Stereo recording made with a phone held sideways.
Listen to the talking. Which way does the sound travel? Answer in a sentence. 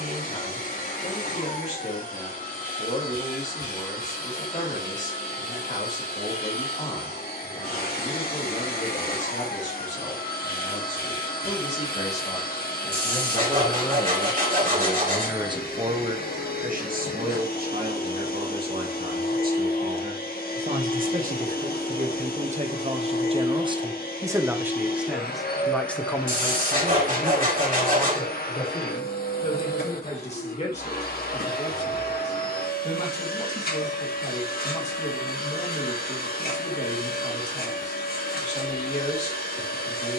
You can hear the talking move from left to right and back again.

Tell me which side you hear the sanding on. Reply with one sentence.
You can hear the sanding on the right.